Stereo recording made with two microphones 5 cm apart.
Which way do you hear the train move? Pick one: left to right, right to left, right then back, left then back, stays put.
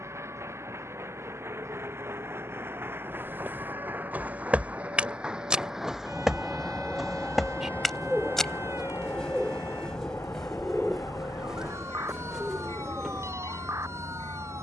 right to left.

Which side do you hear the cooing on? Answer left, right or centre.
centre.